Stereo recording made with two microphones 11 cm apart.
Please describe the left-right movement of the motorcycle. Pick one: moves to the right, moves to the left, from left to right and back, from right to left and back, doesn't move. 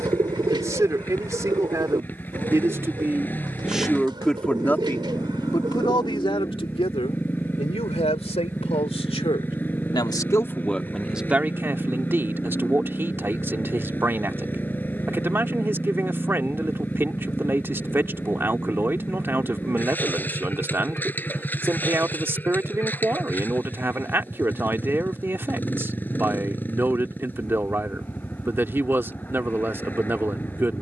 doesn't move.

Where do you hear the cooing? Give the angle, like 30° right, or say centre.
40° right.